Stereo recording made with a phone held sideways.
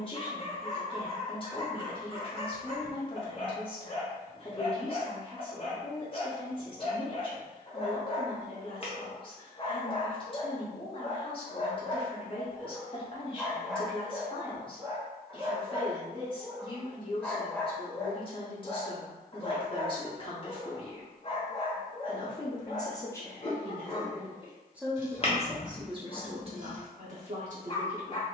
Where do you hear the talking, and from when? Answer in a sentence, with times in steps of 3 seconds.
You can hear the talking on the left from 0 s and on the right from 24 s.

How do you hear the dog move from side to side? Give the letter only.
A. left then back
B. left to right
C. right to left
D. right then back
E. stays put
D.